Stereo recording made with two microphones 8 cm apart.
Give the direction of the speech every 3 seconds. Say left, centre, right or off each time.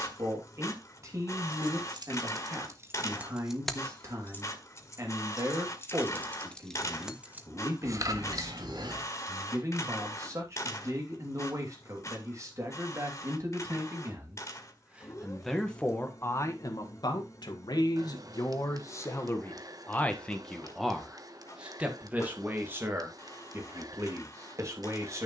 right, right, right, right, right, left, left, right, right.